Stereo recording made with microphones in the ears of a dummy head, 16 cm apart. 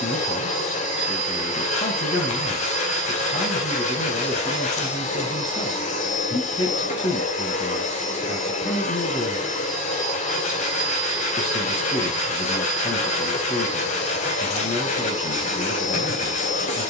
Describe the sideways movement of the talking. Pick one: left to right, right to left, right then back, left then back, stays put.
stays put.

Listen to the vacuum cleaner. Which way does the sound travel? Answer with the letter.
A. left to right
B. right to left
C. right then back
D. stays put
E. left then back
D.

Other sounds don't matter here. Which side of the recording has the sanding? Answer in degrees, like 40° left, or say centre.
40° left.